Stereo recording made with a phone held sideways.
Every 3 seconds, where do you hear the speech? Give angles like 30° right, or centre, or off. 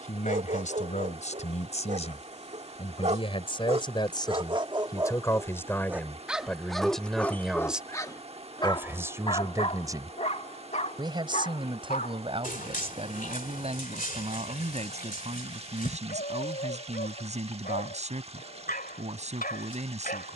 50° left, 30° left, centre, 30° right, 40° right, 50° right, 50° right.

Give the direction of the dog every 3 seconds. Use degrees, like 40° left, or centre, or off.
60° right, 30° right, 10° left, 50° left, 60° left, 70° left, 70° left.